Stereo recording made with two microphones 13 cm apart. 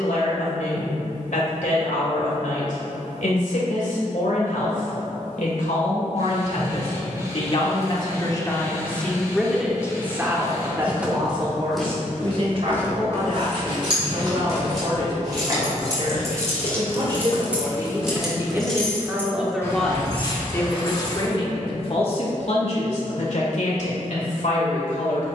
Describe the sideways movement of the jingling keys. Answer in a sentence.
In this clip you hear the jingling keys move to the left.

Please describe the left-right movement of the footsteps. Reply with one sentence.
You can hear the footsteps move from right to left and back again.